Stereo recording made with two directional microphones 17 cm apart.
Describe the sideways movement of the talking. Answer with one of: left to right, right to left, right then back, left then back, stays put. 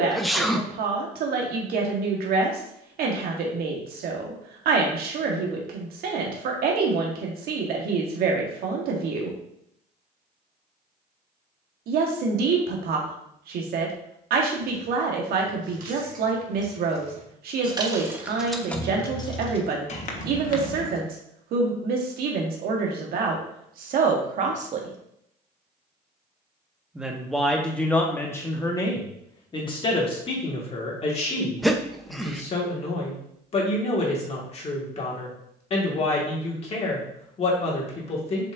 right to left.